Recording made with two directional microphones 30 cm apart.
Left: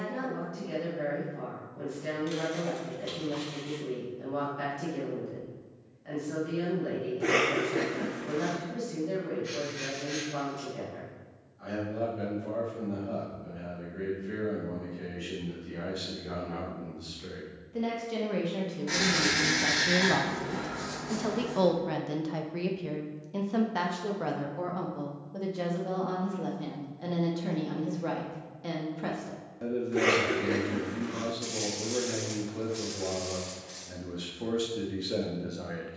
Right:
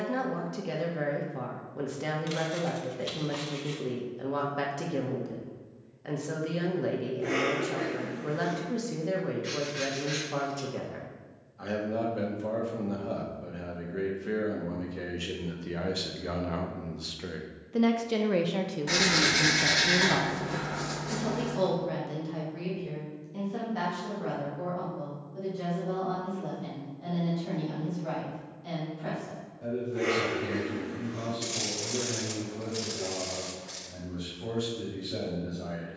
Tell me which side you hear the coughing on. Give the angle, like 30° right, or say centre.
50° left.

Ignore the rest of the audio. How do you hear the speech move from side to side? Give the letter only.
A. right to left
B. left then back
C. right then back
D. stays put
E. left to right
A.